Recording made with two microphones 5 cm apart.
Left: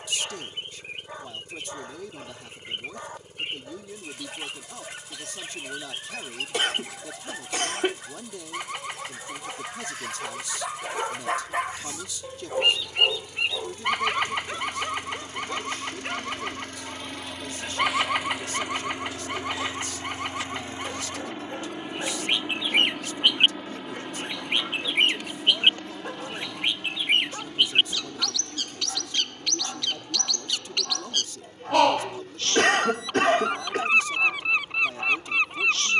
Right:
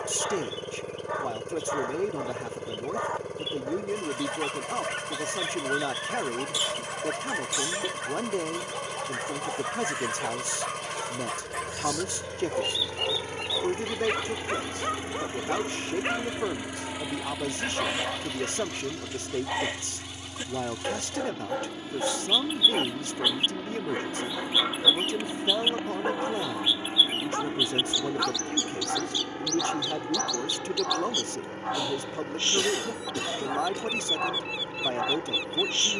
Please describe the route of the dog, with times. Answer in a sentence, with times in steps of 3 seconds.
In this clip you hear the dog on the right from 0 s, in the centre from 9 s and on the right from 15 s.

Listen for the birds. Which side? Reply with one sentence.
In this clip you hear the birds on the left.